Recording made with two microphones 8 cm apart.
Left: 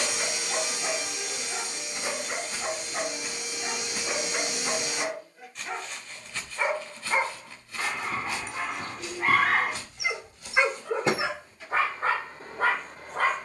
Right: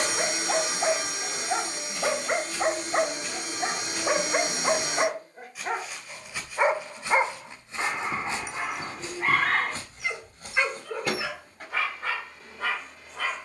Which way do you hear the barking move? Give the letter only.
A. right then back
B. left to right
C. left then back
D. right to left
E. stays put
D.